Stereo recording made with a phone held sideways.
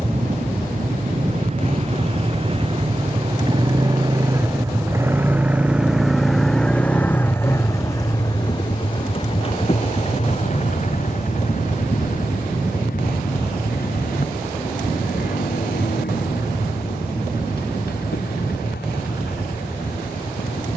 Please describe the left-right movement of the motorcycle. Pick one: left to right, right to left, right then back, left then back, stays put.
right to left.